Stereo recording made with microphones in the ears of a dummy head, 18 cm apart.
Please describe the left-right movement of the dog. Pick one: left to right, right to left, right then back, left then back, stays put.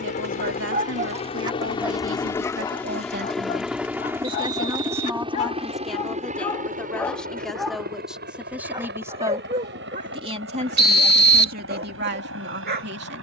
left then back.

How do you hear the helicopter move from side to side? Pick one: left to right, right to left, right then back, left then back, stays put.
left to right.